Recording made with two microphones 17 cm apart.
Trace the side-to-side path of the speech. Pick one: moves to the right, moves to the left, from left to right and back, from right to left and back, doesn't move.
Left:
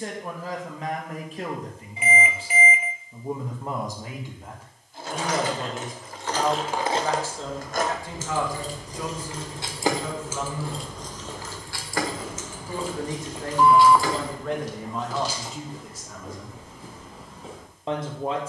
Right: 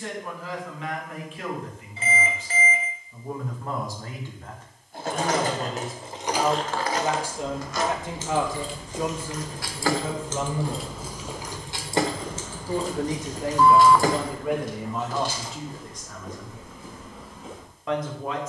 from left to right and back.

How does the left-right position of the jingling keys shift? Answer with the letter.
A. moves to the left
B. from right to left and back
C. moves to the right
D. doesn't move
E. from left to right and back
B.